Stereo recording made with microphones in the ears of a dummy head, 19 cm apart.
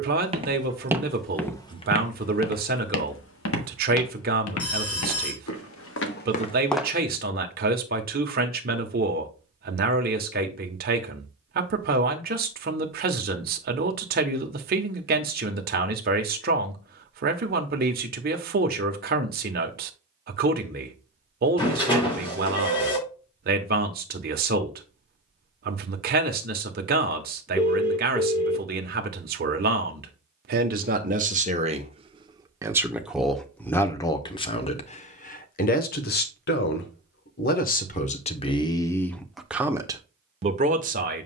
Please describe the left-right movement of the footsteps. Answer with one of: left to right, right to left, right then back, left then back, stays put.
left then back.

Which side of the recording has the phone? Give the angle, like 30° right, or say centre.
20° left.